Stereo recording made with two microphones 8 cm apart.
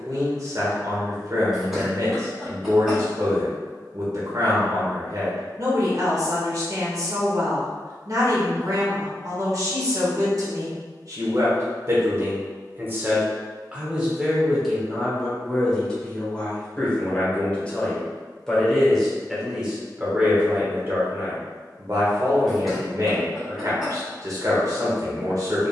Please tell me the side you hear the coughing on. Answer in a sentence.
In this clip you hear the coughing in the centre.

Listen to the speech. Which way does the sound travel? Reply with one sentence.
In this clip you hear the speech go left and come back.